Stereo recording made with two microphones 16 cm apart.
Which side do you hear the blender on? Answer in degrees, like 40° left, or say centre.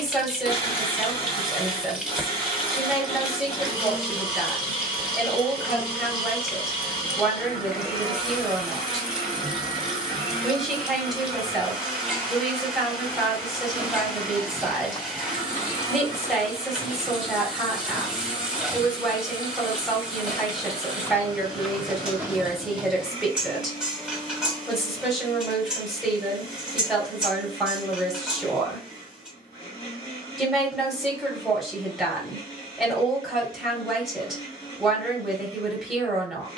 40° left.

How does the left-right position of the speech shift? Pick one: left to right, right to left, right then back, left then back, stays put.
stays put.